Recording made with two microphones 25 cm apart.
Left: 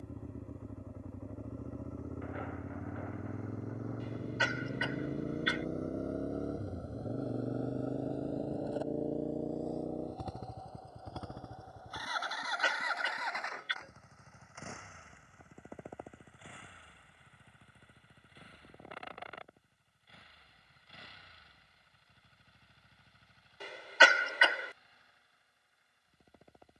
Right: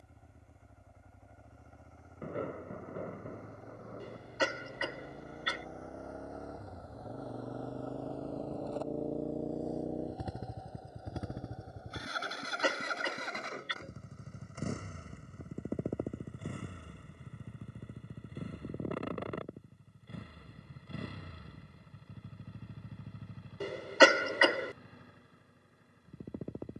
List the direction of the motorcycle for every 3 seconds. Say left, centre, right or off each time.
left, left, left, centre, right, right, right, right, right.